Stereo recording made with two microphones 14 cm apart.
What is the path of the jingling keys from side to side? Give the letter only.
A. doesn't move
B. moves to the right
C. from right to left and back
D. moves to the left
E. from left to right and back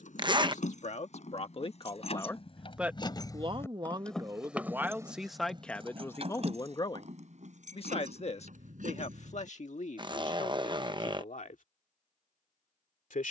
B.